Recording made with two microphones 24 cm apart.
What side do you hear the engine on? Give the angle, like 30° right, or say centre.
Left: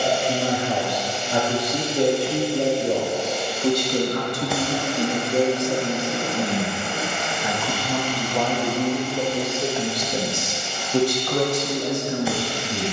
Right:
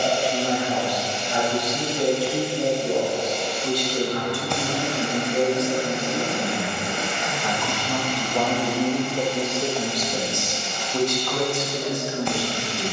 40° right.